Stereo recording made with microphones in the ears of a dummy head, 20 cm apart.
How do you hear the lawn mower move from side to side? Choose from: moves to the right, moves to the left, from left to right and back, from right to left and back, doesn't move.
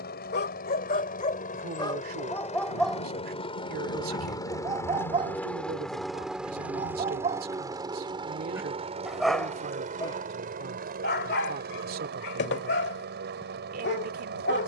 moves to the right.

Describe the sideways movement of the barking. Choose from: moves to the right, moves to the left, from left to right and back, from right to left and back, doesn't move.
from left to right and back.